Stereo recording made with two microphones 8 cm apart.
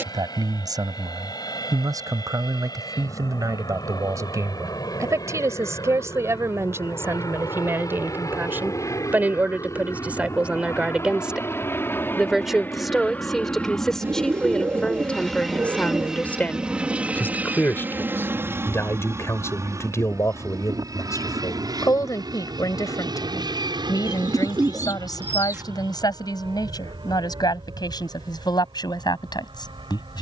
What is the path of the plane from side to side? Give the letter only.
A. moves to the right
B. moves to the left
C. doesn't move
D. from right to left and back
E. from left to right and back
A.